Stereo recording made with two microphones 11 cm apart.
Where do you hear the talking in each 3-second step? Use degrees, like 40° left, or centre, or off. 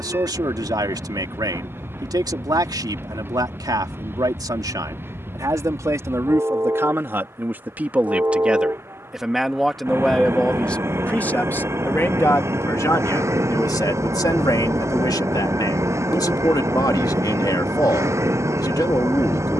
40° right, 40° right, 20° right, 10° left, 30° left, 40° left, 40° left.